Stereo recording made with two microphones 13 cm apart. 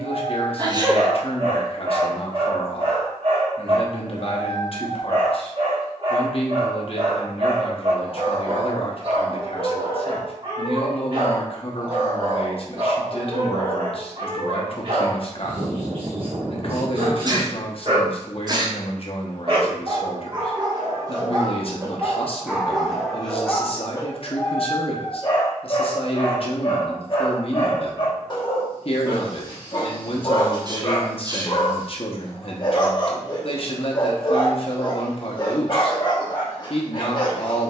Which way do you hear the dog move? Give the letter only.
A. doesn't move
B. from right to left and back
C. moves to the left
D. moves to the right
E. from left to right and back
C.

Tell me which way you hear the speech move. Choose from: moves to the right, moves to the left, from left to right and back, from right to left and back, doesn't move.
doesn't move.